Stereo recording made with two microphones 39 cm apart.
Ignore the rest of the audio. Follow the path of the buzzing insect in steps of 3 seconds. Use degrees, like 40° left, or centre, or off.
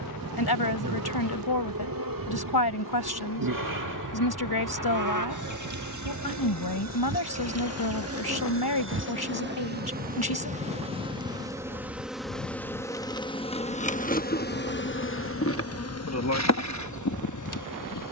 60° right, 50° right, 40° right, 20° right, 10° left, 40° left.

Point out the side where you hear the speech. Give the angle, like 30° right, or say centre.
70° left.